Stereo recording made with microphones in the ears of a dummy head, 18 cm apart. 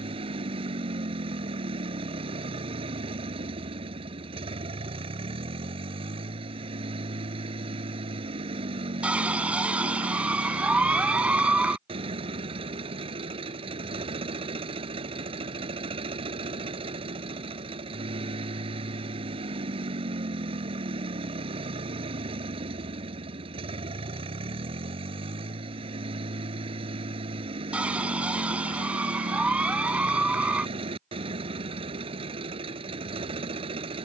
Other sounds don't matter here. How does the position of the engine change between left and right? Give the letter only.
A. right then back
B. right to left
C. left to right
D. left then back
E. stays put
E.